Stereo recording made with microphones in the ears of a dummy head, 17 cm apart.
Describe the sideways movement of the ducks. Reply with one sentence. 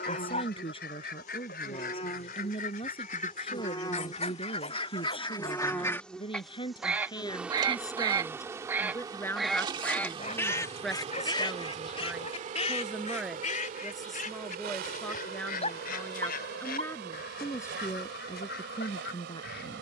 You can hear the ducks move from left to right and back again.